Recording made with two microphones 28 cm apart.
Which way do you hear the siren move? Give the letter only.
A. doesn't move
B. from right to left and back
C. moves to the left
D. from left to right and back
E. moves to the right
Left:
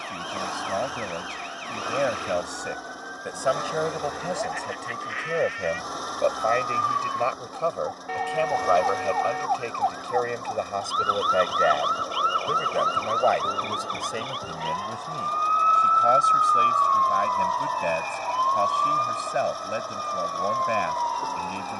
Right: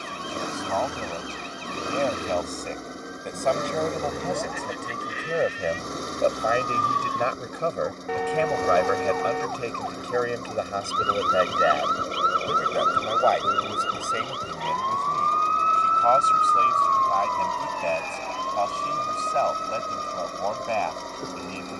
C.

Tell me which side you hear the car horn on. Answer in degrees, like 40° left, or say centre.
60° right.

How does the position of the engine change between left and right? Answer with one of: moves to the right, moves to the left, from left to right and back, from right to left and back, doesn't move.
doesn't move.